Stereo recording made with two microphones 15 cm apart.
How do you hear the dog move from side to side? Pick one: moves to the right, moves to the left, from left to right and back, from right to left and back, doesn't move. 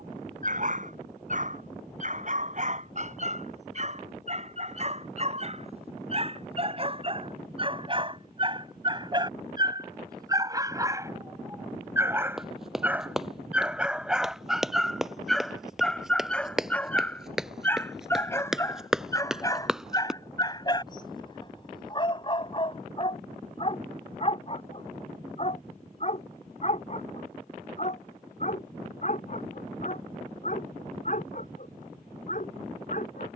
moves to the left.